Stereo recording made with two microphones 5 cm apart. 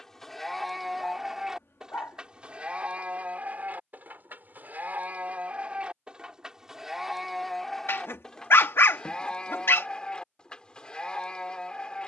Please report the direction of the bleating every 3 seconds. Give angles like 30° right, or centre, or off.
10° right, 40° right, centre, 20° left.